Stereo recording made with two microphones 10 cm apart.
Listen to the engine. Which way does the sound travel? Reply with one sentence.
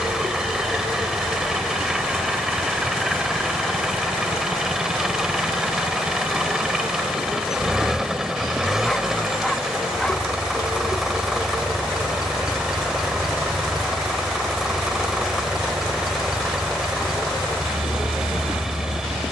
You can hear the engine stay put.